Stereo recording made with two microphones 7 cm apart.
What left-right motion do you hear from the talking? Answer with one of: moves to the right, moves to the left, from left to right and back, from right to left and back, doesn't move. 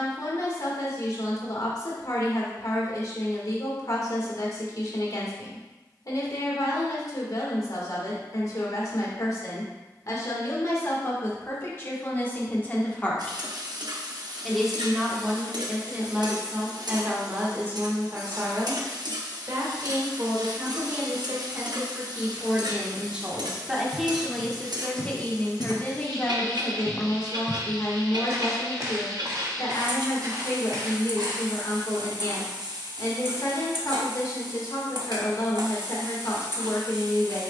from left to right and back.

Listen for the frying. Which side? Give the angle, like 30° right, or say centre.
70° right.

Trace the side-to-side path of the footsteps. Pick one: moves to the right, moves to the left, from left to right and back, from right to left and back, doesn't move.
moves to the right.